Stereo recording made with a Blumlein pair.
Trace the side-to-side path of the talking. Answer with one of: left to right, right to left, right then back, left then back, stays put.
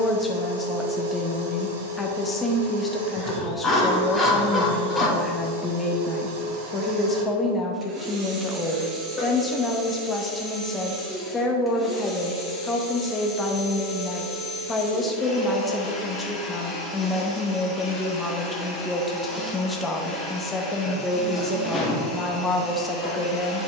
stays put.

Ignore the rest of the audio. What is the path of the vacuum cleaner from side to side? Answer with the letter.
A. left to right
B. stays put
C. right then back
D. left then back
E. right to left
E.